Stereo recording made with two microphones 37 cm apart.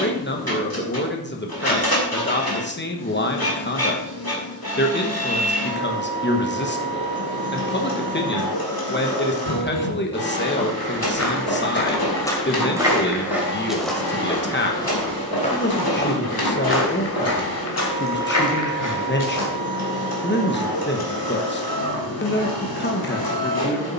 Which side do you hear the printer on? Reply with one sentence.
You can hear the printer on the left.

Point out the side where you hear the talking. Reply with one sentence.
You can hear the talking on the left.